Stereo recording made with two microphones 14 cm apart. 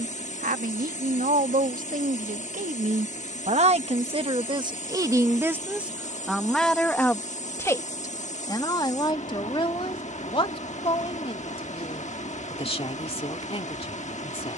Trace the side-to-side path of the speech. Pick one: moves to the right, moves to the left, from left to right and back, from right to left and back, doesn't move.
moves to the left.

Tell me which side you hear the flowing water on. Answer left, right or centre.
left.